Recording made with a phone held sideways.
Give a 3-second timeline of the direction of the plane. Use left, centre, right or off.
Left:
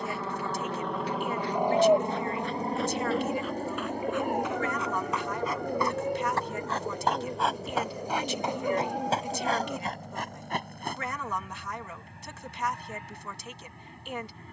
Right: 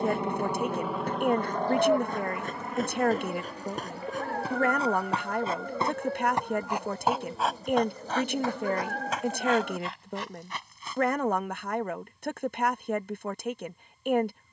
centre, left, left, left, left.